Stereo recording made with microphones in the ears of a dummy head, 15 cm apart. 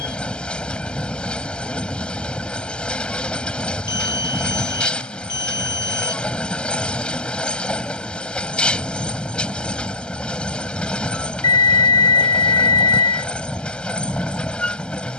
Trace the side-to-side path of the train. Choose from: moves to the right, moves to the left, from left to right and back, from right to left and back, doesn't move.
doesn't move.